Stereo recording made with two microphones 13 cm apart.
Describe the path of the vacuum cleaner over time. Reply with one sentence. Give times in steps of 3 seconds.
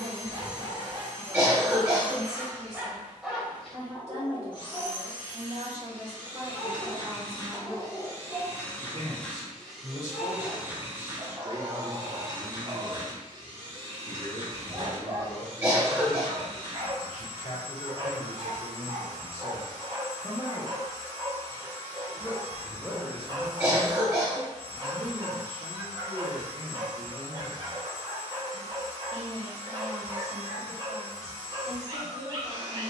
In this clip you hear the vacuum cleaner on the left from 0 s, in the centre from 9 s and on the right from 12 s.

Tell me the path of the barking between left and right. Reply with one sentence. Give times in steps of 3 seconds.
In this clip you hear the barking on the right from 0 s, in the centre from 3 s and on the right from 9 s.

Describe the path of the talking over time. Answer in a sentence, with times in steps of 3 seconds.
In this clip you hear the talking on the right from 0 s, in the centre from 12 s, on the left from 15 s, in the centre from 21 s and on the right from 24 s.